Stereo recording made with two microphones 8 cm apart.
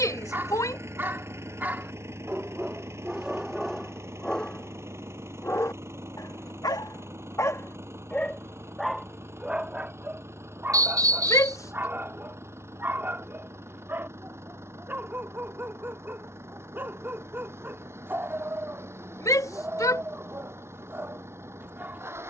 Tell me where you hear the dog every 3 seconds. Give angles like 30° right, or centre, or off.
20° right, 10° left, 30° left, 20° right, 30° right, 30° right, 30° right, 30° right.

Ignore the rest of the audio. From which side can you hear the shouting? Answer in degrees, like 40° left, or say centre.
40° left.